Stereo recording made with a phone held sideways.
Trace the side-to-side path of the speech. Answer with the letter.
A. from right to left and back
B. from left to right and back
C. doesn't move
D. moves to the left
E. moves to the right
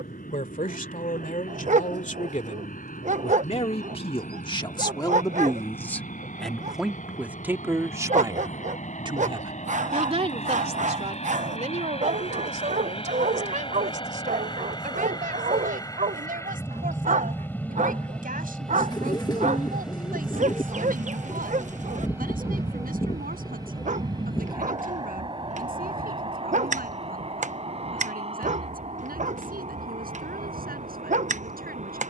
E.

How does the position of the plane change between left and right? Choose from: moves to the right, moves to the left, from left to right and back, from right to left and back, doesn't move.
moves to the right.